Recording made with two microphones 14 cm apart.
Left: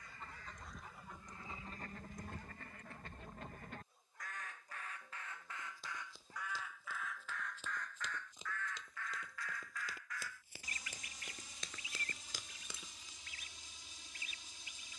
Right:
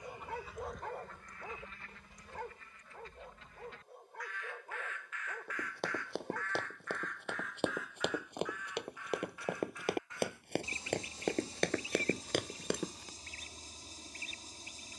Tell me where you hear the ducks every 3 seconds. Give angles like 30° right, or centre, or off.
30° left, 40° left, centre, 30° right, 40° right.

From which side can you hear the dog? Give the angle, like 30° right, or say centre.
80° right.